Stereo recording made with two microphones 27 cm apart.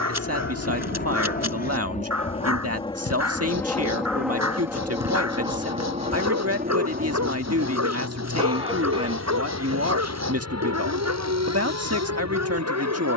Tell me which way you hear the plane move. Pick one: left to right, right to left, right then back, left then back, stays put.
left to right.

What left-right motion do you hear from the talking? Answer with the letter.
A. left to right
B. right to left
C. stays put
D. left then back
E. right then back
C.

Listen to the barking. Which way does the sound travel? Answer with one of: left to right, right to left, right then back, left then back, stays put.
stays put.